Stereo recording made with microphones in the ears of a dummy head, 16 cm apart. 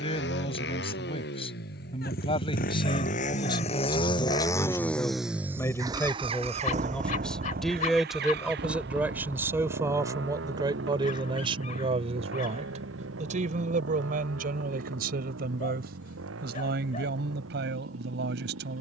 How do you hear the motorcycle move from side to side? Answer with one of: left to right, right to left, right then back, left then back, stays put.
left to right.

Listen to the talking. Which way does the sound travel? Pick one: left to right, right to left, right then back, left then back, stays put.
left to right.